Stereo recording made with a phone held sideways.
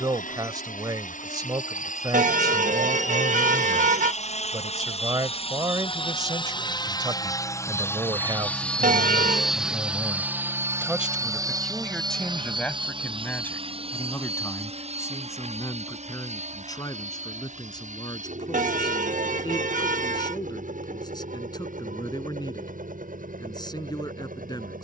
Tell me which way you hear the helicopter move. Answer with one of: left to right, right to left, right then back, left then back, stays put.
left to right.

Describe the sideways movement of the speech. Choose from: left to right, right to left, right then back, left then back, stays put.
right to left.